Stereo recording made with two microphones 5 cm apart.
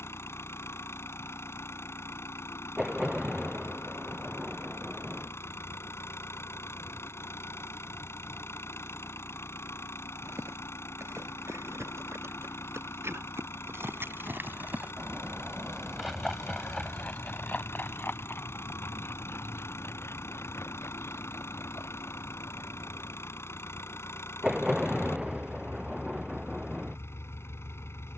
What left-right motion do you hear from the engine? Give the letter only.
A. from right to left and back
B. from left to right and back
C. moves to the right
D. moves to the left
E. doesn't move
E.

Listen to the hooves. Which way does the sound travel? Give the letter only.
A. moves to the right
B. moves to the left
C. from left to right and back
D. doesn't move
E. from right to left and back
B.